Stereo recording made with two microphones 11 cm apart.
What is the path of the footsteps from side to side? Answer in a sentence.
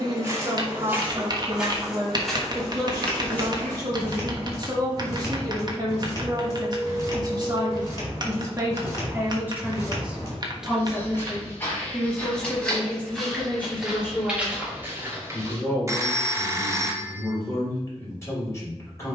In this clip you hear the footsteps go left and come back.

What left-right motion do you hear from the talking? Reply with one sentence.
You can hear the talking go from the right side to the left.